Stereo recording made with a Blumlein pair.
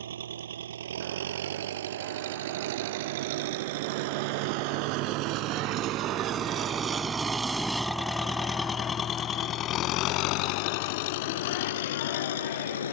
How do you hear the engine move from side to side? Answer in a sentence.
In this clip you hear the engine go from the right side to the left.